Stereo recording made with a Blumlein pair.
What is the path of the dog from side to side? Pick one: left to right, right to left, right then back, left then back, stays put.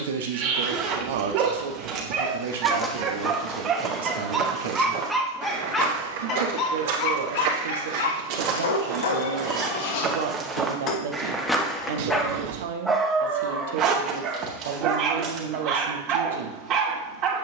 left then back.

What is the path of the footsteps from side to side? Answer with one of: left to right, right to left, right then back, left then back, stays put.
right then back.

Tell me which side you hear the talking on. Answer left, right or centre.
right.